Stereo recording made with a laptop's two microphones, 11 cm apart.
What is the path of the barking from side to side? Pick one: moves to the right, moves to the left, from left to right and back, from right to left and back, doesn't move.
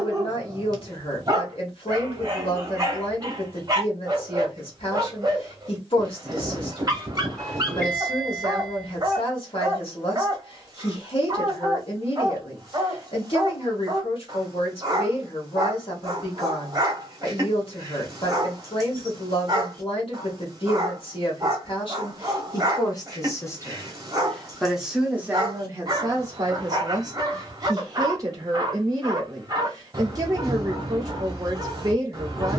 doesn't move.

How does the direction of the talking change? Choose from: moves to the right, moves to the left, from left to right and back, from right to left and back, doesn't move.
moves to the right.